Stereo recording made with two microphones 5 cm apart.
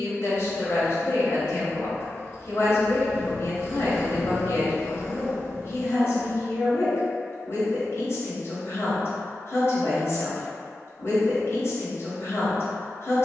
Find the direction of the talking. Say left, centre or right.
left.